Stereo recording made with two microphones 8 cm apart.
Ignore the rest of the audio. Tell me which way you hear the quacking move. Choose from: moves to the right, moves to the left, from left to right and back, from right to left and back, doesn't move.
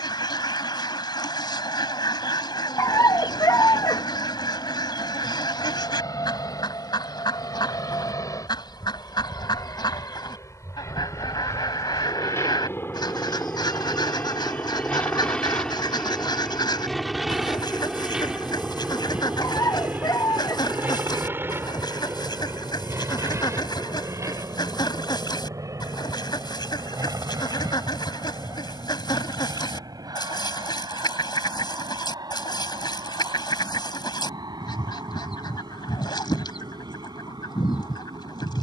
doesn't move.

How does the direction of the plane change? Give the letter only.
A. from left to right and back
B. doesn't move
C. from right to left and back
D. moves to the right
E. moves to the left
D.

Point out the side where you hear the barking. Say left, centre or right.
left.